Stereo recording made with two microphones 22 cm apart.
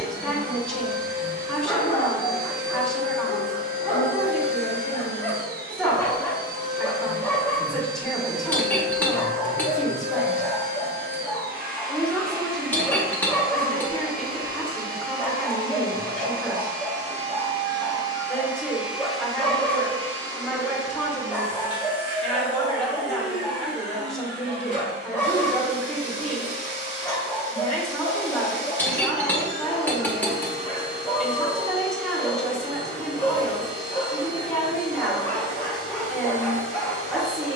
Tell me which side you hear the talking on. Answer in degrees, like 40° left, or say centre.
centre.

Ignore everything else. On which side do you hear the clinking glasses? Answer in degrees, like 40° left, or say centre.
10° left.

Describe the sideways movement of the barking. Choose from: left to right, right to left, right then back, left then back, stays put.
stays put.